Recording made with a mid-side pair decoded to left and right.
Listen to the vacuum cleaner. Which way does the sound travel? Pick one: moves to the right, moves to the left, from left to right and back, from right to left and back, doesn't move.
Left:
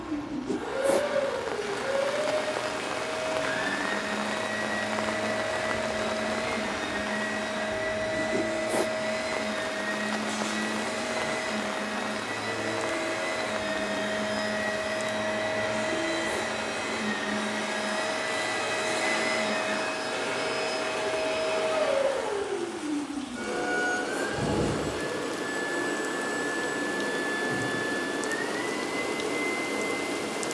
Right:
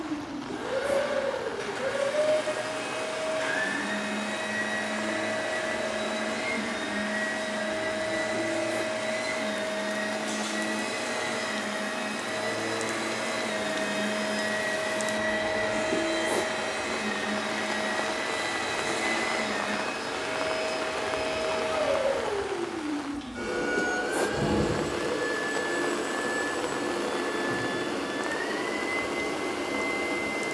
from right to left and back.